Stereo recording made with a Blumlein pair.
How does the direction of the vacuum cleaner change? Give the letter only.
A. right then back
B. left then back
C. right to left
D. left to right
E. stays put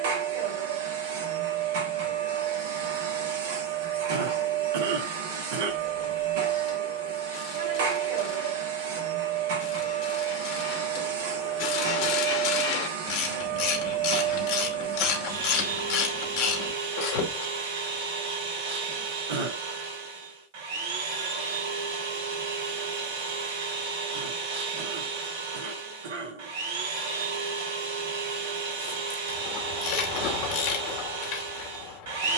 E.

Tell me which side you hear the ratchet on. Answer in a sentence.
You can hear the ratchet on the left.